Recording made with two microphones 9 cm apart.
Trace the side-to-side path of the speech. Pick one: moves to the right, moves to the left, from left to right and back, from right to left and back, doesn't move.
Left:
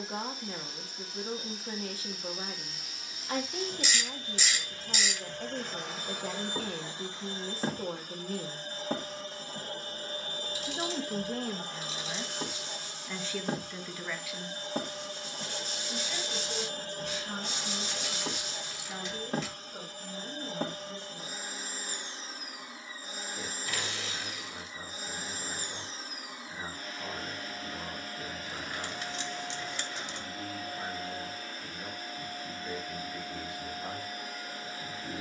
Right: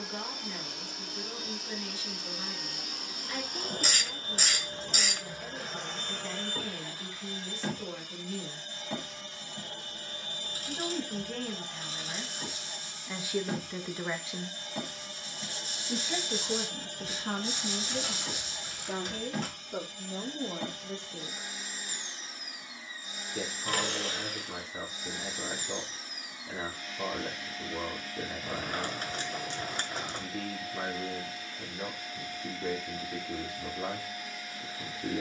moves to the right.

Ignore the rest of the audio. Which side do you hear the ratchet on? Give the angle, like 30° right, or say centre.
50° right.